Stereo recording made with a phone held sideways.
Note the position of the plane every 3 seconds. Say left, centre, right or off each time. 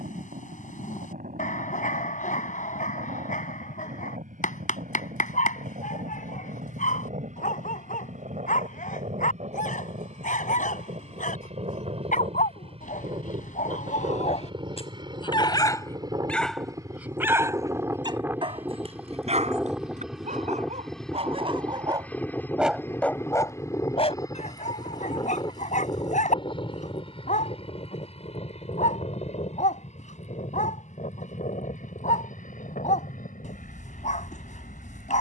right, right, right, right, right, right, centre, centre, left, left, left, left.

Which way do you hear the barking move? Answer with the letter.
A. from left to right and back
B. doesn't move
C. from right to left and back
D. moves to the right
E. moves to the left
A.